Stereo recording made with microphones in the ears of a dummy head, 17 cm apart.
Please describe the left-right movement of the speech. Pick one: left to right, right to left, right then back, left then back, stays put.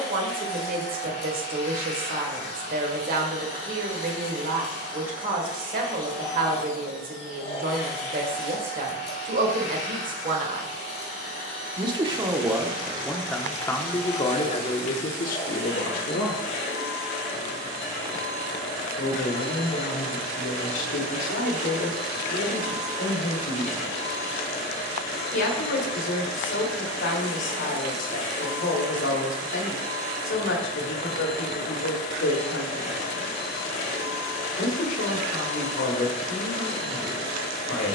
right to left.